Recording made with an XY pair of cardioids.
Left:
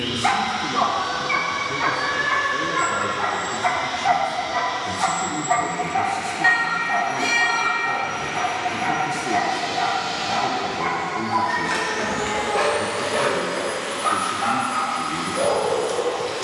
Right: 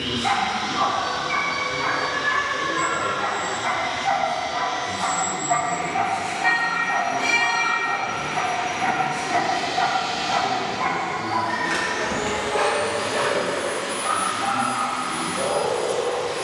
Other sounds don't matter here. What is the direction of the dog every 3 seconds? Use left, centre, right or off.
left, left, centre, centre, left, left.